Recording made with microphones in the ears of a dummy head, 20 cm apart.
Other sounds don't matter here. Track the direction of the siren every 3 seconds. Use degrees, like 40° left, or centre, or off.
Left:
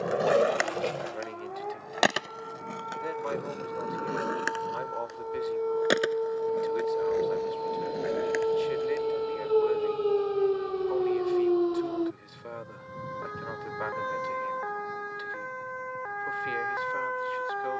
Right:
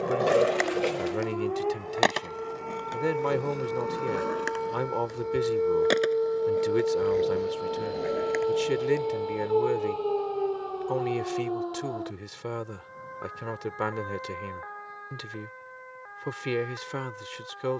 50° right, 40° right, 10° right, 20° left, 50° left, 70° left.